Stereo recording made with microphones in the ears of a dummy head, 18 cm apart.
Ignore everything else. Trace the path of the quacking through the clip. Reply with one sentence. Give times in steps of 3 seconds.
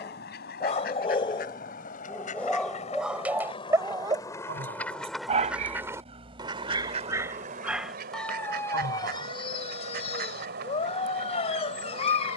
In this clip you hear the quacking on the left from 0 s, in the centre from 3 s and on the right from 6 s.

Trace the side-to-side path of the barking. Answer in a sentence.
In this clip you hear the barking go right and come back.